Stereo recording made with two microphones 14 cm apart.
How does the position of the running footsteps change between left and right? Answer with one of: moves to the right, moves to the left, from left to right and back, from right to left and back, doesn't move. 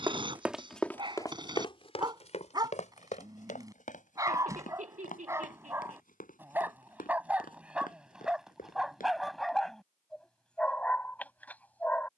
moves to the left.